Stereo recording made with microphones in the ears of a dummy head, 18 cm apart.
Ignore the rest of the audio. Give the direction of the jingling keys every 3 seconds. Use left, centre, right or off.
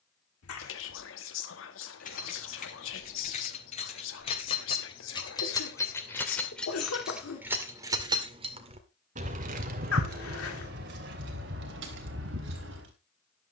left, left, centre, right, right.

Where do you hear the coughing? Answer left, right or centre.
left.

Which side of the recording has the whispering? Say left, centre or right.
left.